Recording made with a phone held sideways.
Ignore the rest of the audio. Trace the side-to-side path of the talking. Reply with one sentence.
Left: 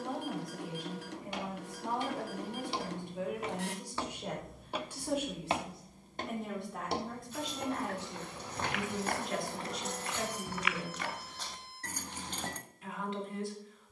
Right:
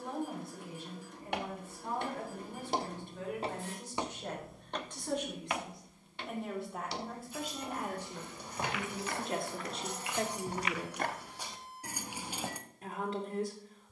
In this clip you hear the talking move from left to right.